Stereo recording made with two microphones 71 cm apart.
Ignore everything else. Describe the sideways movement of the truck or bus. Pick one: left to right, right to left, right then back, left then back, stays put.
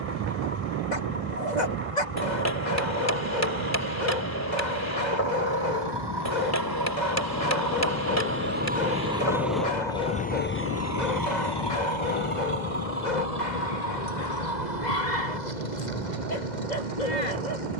right to left.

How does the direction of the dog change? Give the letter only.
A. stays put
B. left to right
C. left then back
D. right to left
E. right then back
A.